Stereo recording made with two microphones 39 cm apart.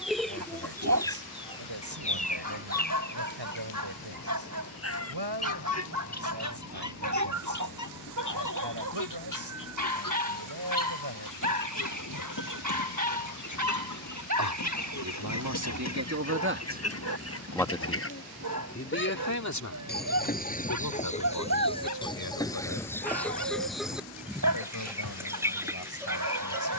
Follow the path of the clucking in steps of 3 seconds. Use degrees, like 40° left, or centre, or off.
10° left, 40° left, 50° left, 50° left, 50° left, 40° left, 30° left, 10° left, 10° right.